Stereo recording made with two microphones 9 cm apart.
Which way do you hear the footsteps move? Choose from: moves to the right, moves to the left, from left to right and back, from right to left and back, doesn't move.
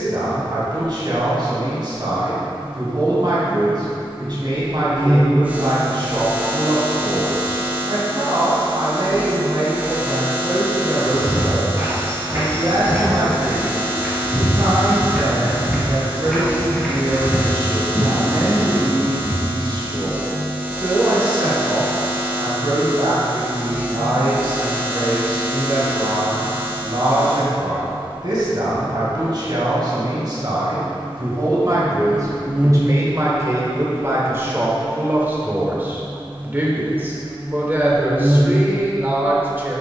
moves to the left.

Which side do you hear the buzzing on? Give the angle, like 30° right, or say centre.
20° right.